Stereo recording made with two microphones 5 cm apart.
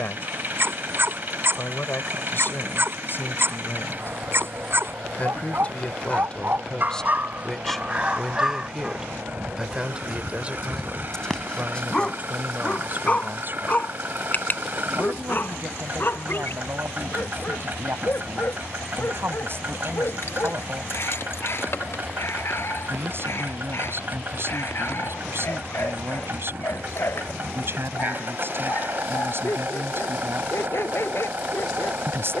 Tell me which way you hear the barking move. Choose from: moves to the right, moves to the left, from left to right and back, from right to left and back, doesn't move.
moves to the left.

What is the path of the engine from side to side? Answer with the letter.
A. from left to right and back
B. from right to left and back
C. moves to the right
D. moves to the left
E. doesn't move
E.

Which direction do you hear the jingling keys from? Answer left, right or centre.
left.